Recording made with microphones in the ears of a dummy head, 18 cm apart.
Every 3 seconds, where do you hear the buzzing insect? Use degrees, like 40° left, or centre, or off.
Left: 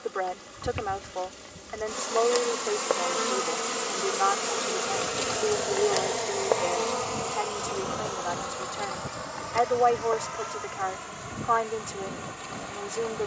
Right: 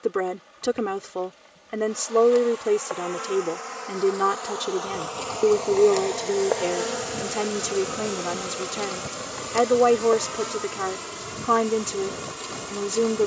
60° left, 30° left, 20° right, 50° right, 50° right.